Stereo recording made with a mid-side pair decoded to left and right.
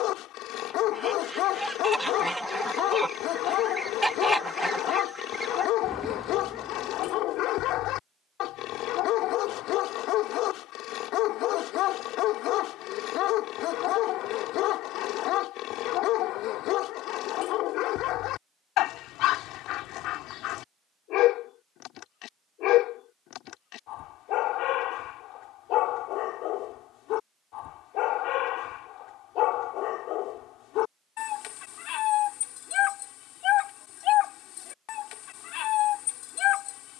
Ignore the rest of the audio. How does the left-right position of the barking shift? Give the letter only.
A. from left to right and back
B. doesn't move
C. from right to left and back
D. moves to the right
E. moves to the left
B.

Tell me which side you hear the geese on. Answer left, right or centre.
centre.